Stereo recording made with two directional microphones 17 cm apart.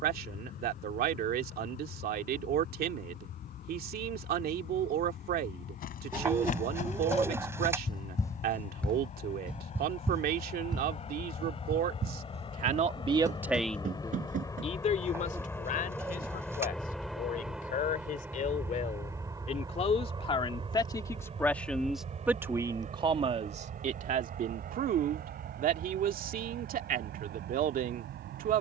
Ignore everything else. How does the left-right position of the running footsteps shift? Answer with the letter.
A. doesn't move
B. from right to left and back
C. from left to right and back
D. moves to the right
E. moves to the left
D.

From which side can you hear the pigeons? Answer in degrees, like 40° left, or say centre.
10° right.